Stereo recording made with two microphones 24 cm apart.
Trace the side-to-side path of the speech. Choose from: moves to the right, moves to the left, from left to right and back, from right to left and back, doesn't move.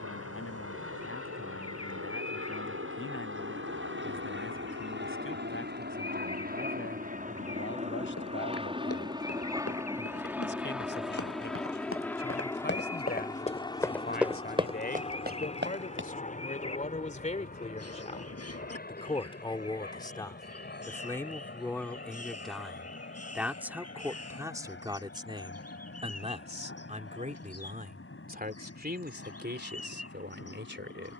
moves to the right.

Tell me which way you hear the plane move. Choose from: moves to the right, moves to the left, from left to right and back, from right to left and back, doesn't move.
moves to the left.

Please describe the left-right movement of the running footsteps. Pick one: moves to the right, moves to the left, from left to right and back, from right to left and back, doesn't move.
moves to the right.